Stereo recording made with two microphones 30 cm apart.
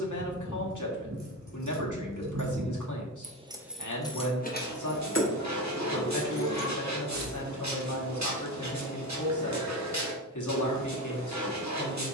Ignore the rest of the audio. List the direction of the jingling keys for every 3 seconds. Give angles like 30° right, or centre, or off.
70° right, 20° left, 60° left, off.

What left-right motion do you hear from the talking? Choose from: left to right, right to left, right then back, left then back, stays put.
stays put.